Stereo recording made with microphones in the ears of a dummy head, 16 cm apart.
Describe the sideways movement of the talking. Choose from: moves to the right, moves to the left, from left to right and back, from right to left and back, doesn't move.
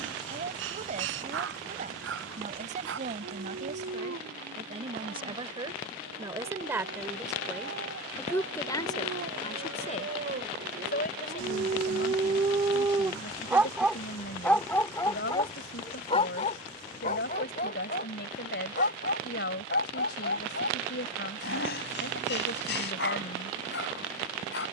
moves to the left.